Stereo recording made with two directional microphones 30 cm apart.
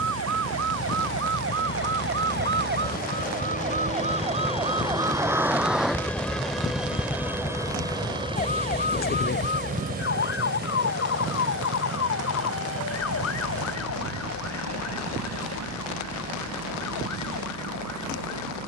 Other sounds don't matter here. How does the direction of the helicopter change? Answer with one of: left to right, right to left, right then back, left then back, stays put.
left to right.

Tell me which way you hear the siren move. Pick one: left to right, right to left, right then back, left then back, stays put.
right to left.